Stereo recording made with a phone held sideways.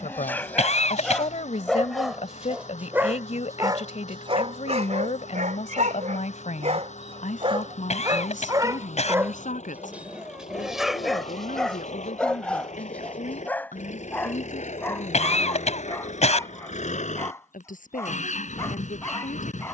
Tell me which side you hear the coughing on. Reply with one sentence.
You can hear the coughing on the left.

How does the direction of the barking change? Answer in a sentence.
You can hear the barking move from left to right and back again.